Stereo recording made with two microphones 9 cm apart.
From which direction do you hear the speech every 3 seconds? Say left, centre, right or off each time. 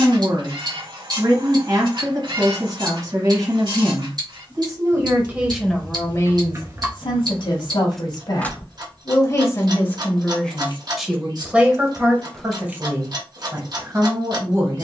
right, right, left, centre, right.